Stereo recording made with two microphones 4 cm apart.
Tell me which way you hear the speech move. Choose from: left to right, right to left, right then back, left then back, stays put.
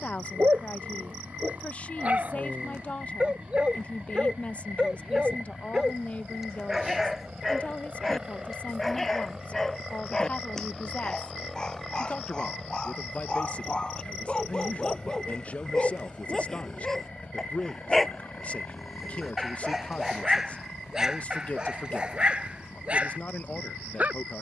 stays put.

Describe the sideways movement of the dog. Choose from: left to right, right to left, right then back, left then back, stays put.
left then back.